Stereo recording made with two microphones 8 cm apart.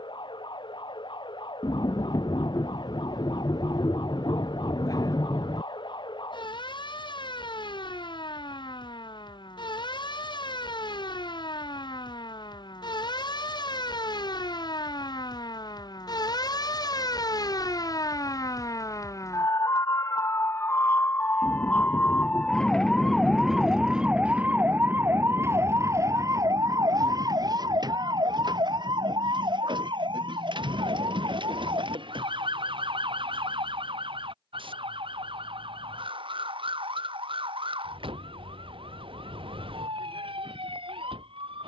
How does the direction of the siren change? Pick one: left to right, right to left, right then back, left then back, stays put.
left to right.